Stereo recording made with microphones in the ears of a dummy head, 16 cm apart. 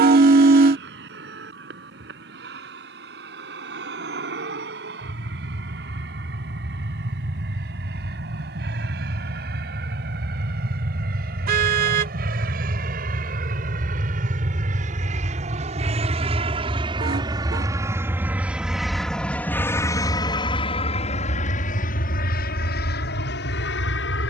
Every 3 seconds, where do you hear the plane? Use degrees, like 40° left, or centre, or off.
70° right, 70° right, 60° right, 60° right, 50° right, 30° right, 10° left, 50° left.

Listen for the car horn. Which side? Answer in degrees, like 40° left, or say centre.
50° right.